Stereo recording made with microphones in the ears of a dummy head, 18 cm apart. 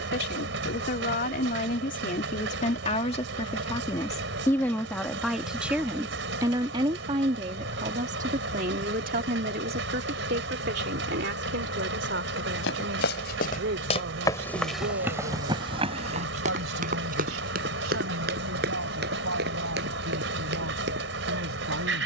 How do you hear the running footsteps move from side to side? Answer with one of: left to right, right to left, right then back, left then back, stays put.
left to right.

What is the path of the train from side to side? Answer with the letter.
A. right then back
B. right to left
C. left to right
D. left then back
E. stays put
E.